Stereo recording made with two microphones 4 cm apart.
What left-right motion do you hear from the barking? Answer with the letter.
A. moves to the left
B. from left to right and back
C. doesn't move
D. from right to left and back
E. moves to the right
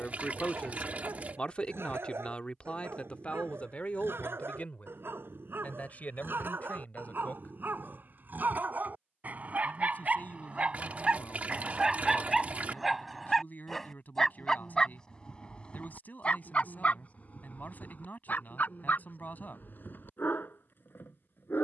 A.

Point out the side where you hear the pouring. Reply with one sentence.
In this clip you hear the pouring on the right.